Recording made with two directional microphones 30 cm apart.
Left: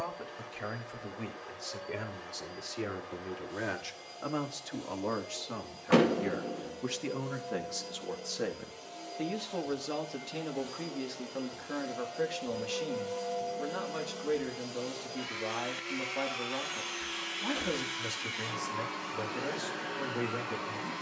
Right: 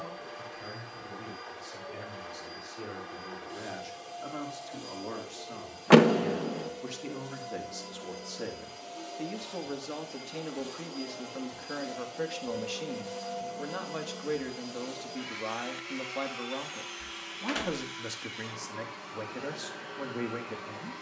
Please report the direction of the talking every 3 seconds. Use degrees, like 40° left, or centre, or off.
60° left, 50° left, 30° left, 10° left, 10° right, 10° right, 10° right.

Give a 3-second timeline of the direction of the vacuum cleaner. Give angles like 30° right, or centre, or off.
40° right, 40° right, 30° right, 20° right, 10° right, 20° left, 30° left.